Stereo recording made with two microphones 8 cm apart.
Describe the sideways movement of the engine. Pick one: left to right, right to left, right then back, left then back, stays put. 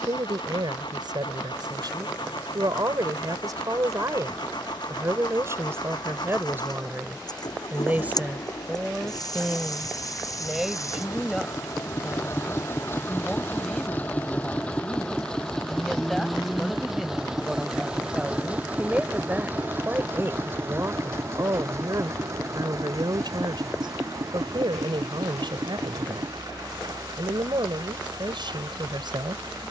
left to right.